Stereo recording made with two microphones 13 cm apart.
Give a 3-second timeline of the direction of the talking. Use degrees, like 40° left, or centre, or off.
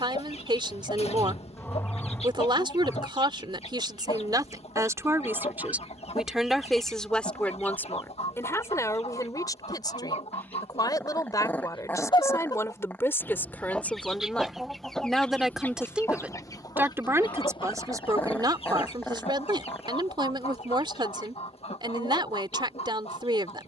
40° right, 30° right, 10° left, 30° left, 20° left, 10° right, 40° right, 40° right.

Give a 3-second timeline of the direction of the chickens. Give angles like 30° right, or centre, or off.
60° left, 60° left, 60° left, 60° left, 10° left, 30° left, 50° left, 60° left.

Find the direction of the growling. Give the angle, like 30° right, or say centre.
20° left.